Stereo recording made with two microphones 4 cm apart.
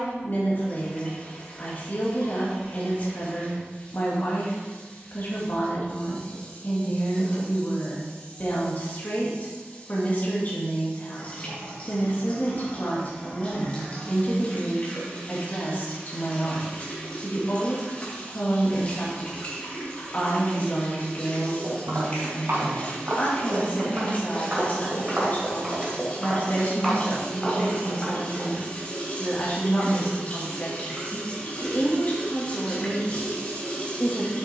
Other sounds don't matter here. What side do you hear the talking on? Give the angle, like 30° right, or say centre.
40° left.